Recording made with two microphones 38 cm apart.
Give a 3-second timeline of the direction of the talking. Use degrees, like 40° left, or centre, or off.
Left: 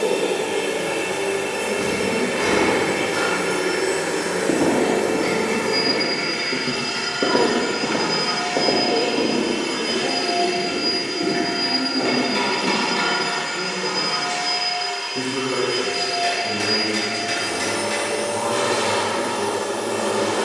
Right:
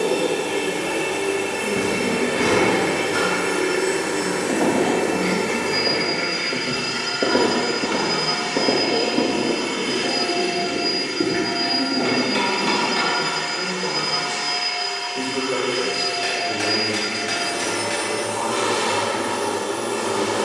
40° right, 40° right, 40° right, 10° right, 20° left, 30° left, 30° left.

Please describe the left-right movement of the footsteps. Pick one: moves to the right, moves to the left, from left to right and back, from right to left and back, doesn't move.
moves to the right.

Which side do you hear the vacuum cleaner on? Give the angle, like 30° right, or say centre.
40° right.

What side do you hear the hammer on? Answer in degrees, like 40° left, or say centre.
80° right.